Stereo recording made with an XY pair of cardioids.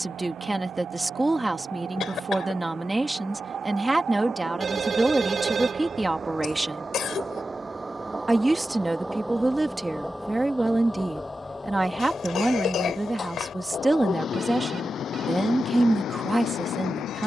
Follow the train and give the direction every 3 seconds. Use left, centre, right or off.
right, right, right, centre, left, left.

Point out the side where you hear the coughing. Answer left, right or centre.
left.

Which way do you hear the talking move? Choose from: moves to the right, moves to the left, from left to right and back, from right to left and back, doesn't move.
doesn't move.